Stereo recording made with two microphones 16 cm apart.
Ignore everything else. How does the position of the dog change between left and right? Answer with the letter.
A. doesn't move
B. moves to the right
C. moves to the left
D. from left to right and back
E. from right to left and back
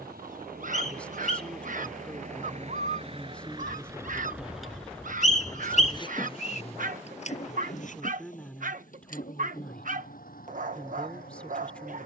A.